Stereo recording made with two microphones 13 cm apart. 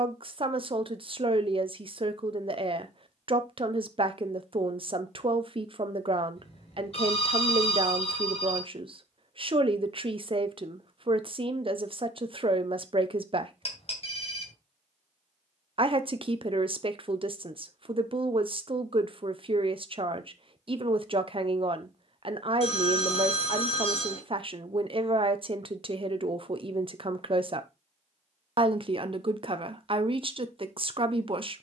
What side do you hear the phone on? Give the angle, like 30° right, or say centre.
50° left.